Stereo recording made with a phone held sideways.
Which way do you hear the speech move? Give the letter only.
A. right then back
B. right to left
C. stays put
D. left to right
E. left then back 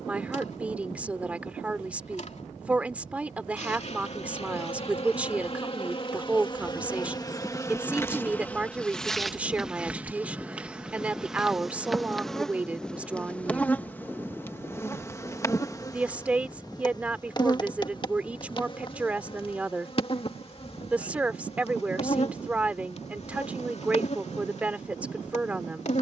C.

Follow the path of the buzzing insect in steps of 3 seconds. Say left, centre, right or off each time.
left, left, left, centre, centre, left, left, left, left.